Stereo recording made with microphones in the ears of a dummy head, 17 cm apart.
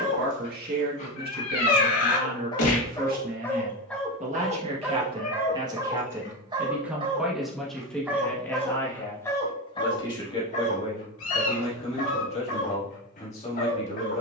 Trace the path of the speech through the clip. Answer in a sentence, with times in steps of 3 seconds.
In this clip you hear the speech on the right from 0 s, in the centre from 6 s and on the left from 9 s.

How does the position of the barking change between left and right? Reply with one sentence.
You can hear the barking go right and come back.